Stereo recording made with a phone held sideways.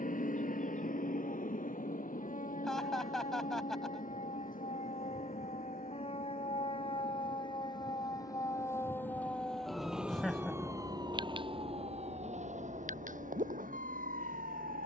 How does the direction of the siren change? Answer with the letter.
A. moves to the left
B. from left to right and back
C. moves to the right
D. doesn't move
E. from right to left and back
C.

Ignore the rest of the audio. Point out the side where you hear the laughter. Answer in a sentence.
You can hear the laughter in the centre.